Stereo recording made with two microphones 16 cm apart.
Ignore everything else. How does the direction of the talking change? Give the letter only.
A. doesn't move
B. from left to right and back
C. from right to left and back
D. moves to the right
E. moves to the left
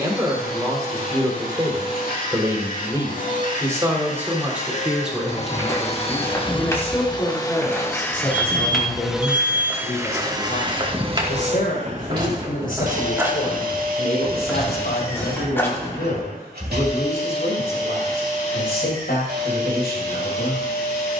E.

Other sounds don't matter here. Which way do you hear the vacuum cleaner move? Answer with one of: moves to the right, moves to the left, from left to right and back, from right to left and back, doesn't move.
moves to the right.